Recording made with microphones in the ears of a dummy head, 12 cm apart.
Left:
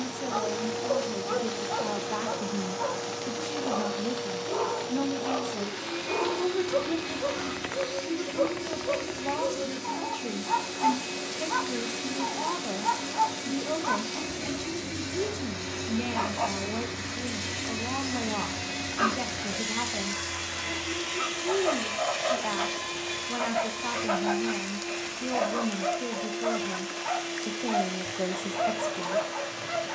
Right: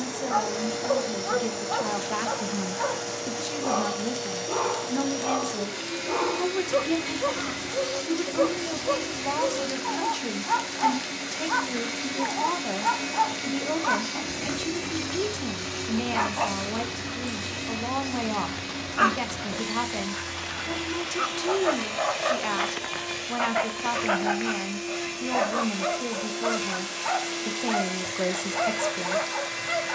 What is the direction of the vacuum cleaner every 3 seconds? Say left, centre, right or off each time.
right, right, right, right, right, centre, left, centre, right, right.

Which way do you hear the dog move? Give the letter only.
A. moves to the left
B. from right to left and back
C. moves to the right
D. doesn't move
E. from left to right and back
D.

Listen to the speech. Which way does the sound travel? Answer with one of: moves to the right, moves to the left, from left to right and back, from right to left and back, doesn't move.
doesn't move.